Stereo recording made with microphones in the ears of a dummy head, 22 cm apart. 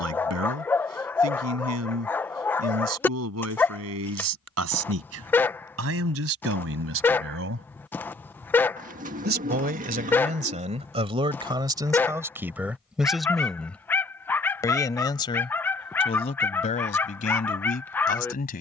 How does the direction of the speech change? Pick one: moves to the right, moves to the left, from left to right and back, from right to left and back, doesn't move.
moves to the left.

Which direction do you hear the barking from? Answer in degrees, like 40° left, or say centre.
10° left.